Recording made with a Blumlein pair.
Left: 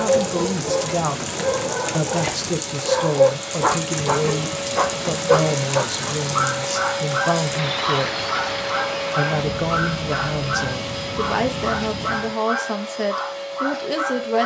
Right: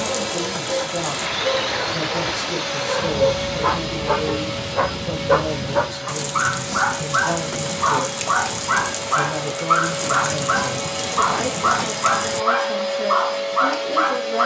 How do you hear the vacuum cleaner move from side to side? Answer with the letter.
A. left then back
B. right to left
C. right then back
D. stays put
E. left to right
A.